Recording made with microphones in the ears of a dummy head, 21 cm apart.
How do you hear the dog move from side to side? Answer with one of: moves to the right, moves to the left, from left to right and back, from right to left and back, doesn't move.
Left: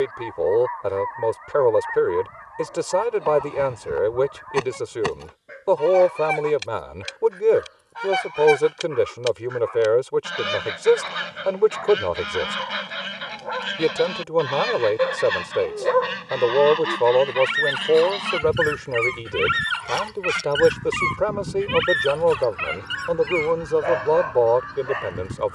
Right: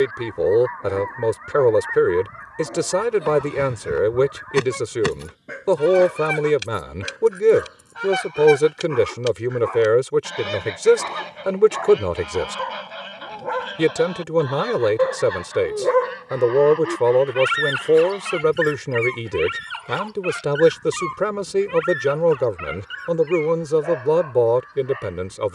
moves to the left.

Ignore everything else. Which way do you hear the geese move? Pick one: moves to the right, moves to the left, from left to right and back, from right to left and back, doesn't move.
moves to the left.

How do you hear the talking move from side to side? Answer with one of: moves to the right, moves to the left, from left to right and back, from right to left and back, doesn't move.
doesn't move.